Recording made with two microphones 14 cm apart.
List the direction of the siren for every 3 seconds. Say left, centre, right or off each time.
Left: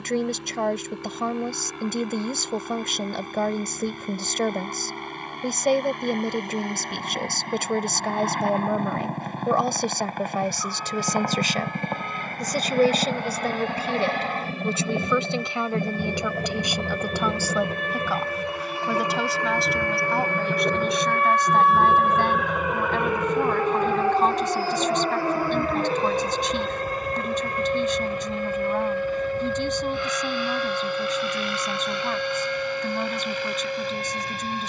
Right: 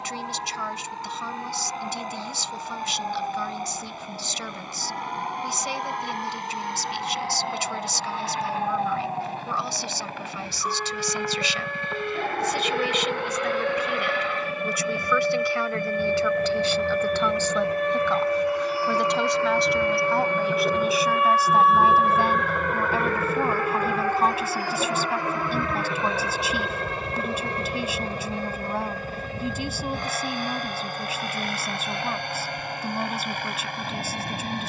right, right, right, right, right, right, right, centre, left, left, left, left.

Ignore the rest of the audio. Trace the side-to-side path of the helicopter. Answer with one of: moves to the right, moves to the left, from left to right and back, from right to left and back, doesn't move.
moves to the right.